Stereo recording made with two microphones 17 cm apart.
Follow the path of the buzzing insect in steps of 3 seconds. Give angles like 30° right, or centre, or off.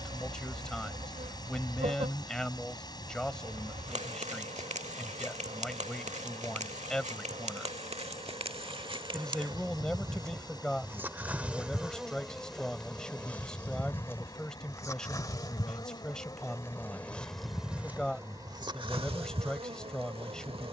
40° right, 40° right, 40° right, 20° right, 10° left, 10° left, 30° right.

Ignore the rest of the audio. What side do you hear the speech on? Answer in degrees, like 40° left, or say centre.
centre.